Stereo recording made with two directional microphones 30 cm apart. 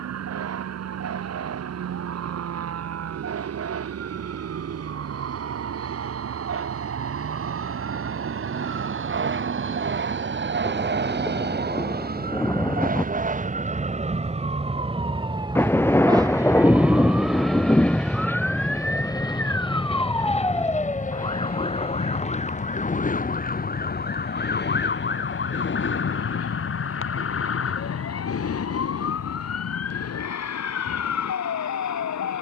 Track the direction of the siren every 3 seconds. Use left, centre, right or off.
right, right, right, right, right, centre, centre, left, left, left, left.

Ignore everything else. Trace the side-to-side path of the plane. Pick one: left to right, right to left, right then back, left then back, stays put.
right to left.